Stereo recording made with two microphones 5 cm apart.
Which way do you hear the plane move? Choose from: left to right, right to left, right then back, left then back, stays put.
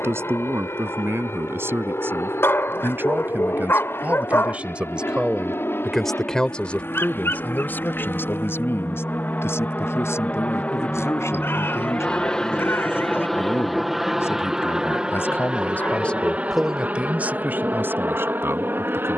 left to right.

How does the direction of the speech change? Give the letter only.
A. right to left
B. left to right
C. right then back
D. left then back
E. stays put
D.